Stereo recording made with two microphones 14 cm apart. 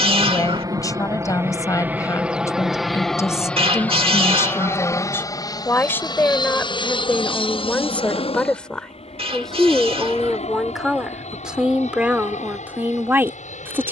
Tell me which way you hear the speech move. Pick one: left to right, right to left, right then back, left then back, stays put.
left to right.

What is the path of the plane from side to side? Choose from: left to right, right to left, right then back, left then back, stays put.
right to left.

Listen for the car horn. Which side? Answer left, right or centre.
right.